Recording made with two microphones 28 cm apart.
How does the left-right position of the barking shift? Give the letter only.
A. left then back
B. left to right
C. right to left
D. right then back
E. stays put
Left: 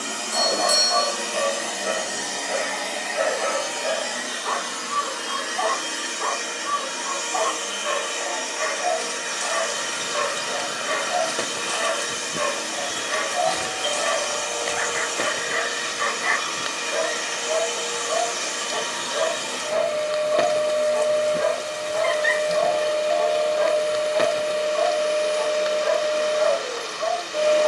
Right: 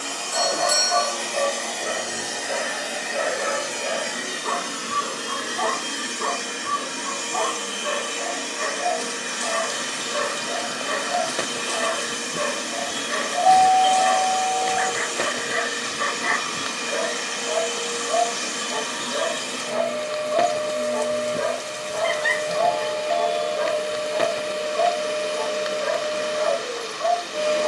E.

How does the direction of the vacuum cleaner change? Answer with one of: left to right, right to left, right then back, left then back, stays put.
left to right.